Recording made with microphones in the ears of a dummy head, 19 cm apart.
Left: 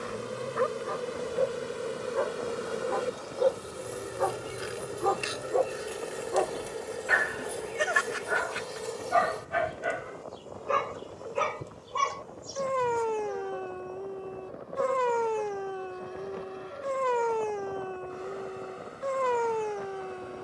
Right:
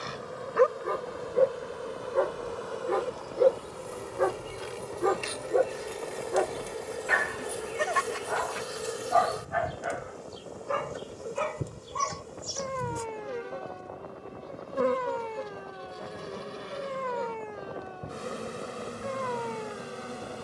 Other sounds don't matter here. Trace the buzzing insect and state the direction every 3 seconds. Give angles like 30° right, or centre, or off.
30° left, 20° left, centre, 20° right, 40° right, 50° right, 60° right.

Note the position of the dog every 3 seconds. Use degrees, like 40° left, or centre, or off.
50° right, 30° right, 10° left, 40° left, 60° left, 60° left, 60° left.